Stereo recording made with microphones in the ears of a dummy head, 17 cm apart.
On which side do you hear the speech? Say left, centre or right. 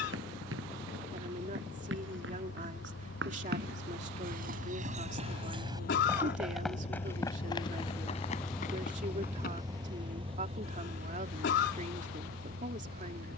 right.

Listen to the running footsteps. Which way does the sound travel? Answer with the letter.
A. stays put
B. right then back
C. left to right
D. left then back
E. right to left
E.